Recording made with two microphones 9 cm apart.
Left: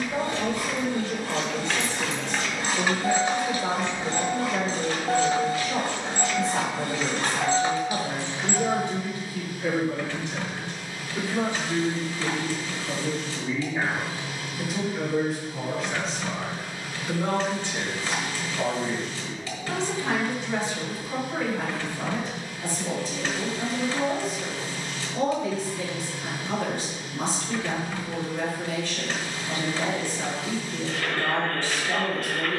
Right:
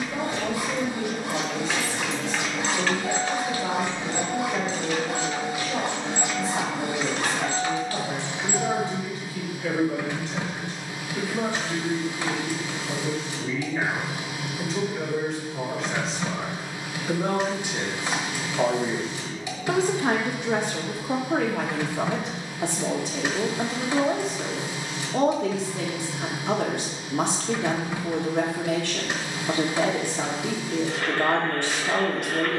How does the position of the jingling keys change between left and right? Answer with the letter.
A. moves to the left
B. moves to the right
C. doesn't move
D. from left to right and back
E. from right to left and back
E.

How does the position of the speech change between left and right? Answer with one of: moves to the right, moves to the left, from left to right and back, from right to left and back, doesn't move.
moves to the right.